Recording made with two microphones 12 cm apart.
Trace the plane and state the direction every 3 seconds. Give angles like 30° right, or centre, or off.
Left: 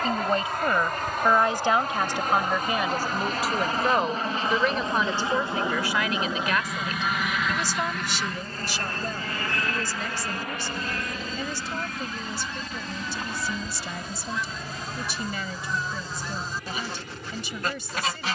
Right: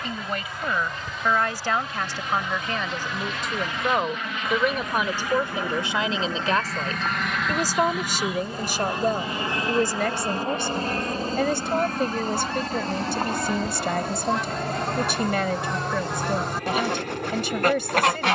60° left, 30° left, centre, 30° right, 40° right, 50° right.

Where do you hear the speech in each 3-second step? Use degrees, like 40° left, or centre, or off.
20° left, 10° right, 40° right, 60° right, 70° right, 70° right.